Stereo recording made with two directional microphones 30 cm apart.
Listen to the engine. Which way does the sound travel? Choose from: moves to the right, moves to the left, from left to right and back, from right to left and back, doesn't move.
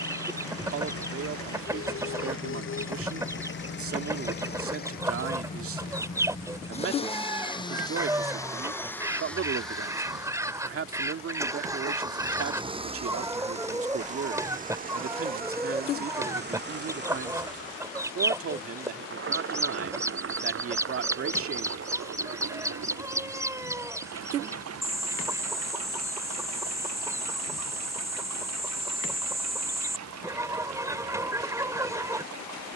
moves to the right.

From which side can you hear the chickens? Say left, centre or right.
centre.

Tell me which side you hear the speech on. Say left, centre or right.
right.